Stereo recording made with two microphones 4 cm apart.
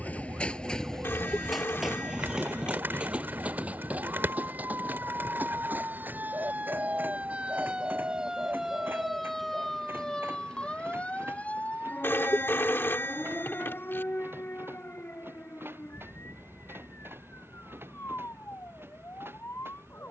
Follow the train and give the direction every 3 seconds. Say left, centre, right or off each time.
centre, right, right, right, right, right, right.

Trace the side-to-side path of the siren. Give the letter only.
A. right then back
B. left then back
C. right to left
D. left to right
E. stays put
C.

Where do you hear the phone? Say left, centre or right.
left.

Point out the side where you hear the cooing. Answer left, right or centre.
right.